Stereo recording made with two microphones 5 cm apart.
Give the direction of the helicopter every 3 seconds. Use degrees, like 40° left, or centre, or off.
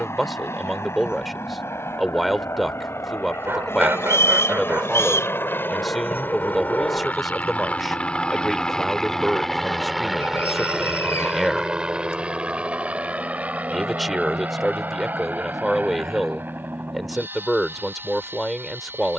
70° left, 60° left, 30° left, 10° right, 30° right, 40° right, 50° right.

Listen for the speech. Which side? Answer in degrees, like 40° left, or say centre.
centre.